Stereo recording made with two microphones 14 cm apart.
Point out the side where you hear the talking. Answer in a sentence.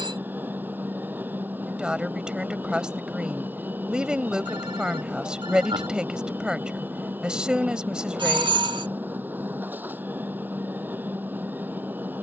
You can hear the talking in the centre.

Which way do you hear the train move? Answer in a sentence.
You can hear the train stay put.